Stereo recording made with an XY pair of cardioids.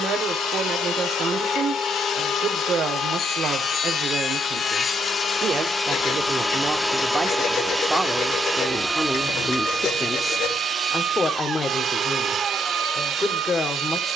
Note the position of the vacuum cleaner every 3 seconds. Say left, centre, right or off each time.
left, left, centre, right, right.